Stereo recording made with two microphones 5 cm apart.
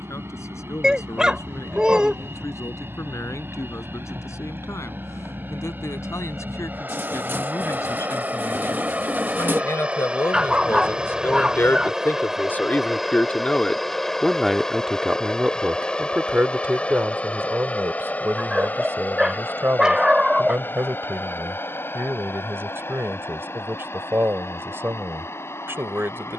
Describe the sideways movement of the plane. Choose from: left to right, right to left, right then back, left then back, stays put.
right to left.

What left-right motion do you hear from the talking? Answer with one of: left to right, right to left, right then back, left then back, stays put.
left to right.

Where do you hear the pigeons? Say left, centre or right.
right.